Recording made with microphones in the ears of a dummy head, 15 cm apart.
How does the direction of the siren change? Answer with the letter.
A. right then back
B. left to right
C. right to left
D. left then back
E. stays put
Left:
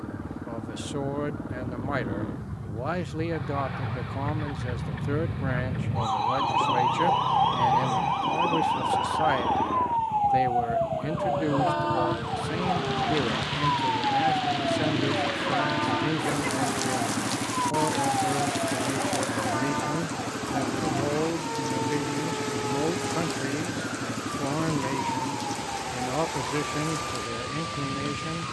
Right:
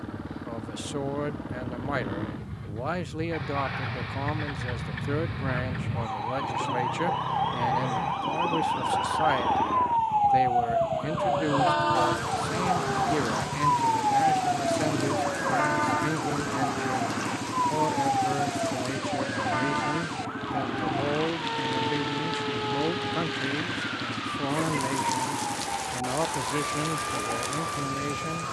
B.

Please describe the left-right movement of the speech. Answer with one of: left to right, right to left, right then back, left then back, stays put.
stays put.